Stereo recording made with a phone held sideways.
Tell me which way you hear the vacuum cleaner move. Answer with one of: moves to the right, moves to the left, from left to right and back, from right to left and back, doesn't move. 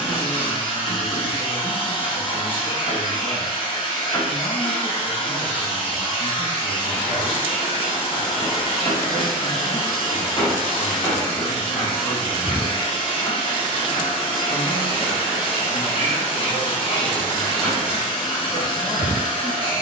doesn't move.